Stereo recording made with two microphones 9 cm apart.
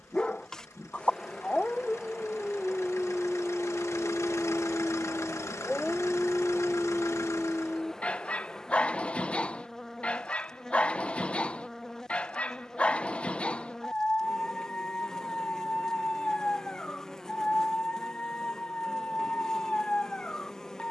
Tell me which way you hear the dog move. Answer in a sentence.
In this clip you hear the dog stay in one place.